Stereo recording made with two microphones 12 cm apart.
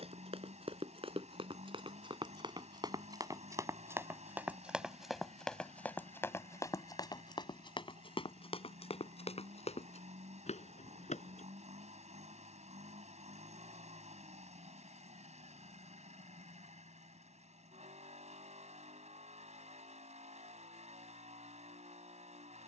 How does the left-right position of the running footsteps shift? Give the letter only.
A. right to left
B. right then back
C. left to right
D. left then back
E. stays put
A.